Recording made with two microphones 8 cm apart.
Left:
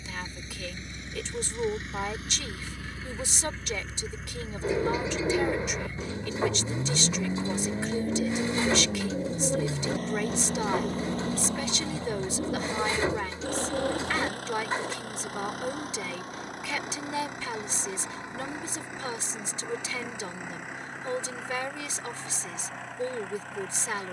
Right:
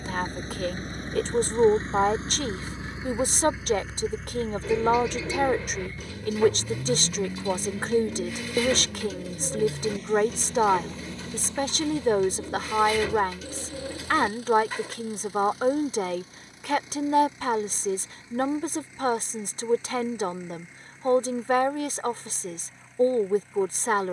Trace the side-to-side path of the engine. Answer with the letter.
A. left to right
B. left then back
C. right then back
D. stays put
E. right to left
E.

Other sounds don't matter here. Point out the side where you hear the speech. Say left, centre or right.
right.